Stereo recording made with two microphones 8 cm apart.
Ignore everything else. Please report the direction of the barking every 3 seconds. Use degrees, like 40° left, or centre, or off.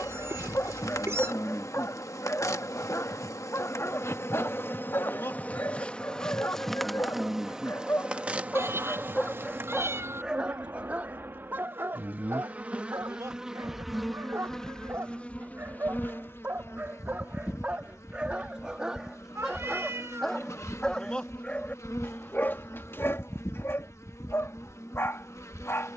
30° left, 30° left, 30° left, 10° right, 40° right, 20° right, centre, 30° left, 30° left.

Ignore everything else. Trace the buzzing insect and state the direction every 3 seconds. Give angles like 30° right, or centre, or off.
40° left, 30° left, 10° right, 30° right, 10° right, 30° left, 40° left, 40° left, 40° left.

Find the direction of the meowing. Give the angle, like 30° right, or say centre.
30° right.